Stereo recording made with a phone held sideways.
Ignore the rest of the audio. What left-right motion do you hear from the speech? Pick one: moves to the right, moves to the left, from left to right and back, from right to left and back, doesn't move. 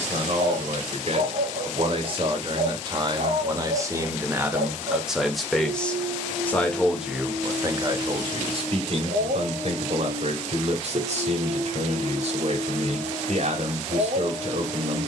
from right to left and back.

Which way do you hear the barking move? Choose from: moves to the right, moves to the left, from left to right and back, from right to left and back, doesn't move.
doesn't move.